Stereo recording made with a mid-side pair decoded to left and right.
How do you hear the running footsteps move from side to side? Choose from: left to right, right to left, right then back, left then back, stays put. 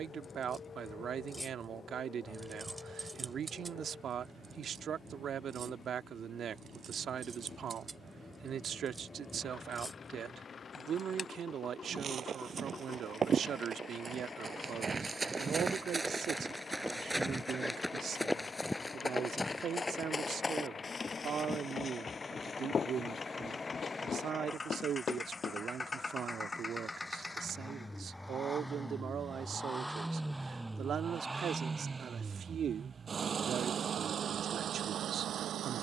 right to left.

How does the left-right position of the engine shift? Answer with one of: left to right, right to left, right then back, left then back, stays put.
left to right.